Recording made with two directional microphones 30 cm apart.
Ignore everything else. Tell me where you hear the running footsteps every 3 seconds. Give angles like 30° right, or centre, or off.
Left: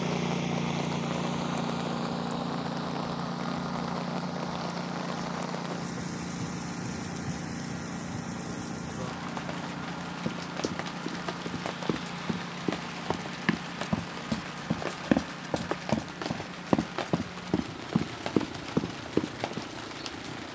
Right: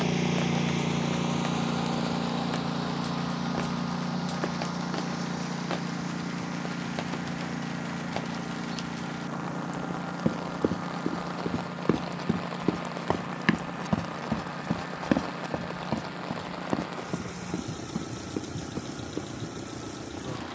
off, off, off, 50° right, 20° right, 30° left, 60° left.